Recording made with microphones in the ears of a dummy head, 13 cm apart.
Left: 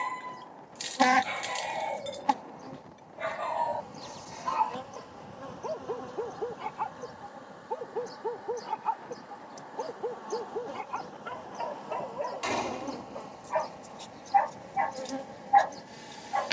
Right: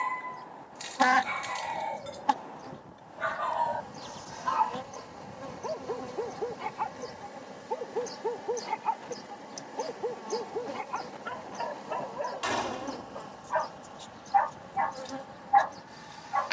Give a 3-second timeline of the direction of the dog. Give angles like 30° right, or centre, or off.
40° left, 10° left, centre, centre, 20° left, 30° left.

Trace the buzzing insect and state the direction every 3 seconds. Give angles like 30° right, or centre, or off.
20° left, centre, 20° right, 20° right, 10° left, 30° left.